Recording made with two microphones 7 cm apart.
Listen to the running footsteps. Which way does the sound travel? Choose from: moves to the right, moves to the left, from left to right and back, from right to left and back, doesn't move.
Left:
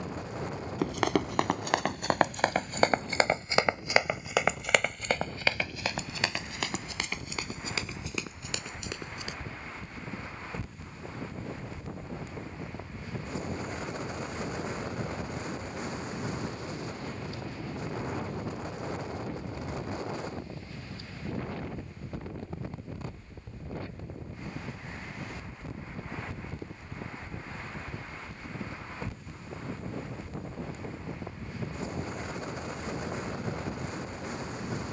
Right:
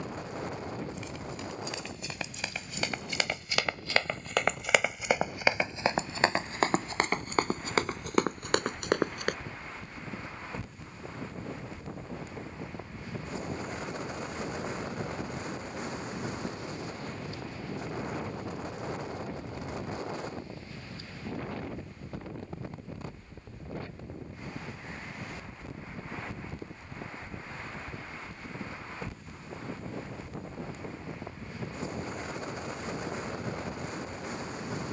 moves to the right.